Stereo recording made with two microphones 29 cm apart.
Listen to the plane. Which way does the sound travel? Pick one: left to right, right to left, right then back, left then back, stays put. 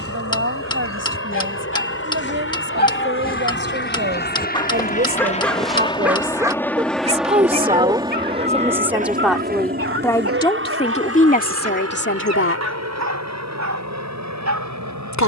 left to right.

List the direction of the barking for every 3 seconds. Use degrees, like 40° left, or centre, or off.
40° left, 20° left, 30° right, 50° right, 70° right.